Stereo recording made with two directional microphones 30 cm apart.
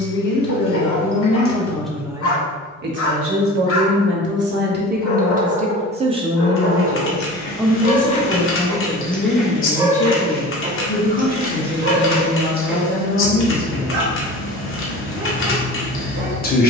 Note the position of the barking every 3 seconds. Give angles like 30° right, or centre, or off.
50° left, 50° left, 30° left, 20° right, 40° right, 40° right.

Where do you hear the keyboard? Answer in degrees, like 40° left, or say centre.
40° left.